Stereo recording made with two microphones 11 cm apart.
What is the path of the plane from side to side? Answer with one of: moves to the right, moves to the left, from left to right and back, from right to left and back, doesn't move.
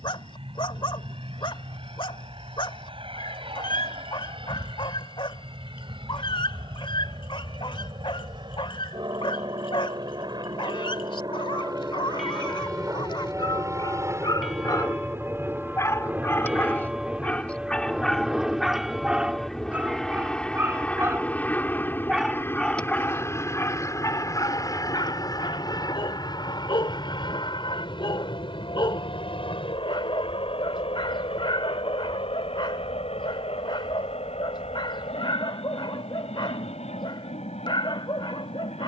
moves to the left.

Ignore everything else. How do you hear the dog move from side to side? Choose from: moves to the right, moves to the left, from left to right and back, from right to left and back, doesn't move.
from left to right and back.